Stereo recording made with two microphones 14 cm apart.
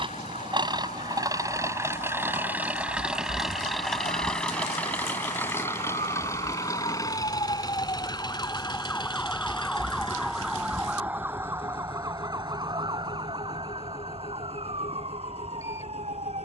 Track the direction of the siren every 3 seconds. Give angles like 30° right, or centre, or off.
70° left, 60° left, 30° left, 10° right, 40° right, 50° right.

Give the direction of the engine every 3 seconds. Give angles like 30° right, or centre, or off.
30° right, 10° left, 30° left, 40° left, 50° left, 50° left.